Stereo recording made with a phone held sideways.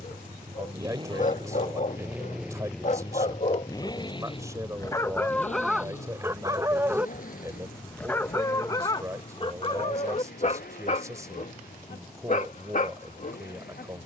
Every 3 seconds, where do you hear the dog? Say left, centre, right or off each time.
left, left, centre, left, left.